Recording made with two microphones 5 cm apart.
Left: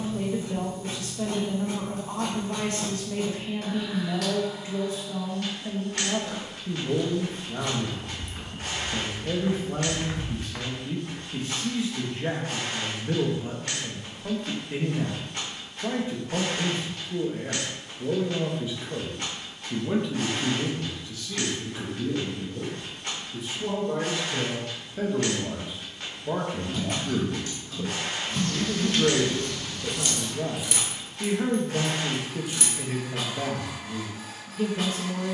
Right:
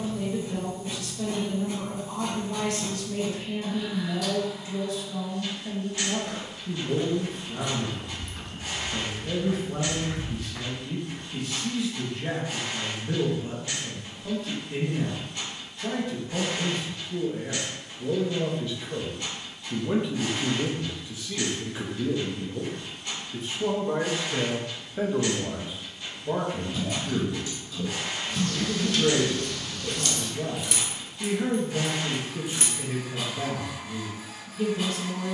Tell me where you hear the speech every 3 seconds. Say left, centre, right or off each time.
left, left, left, left, left, left, centre, right, centre, left, left, left.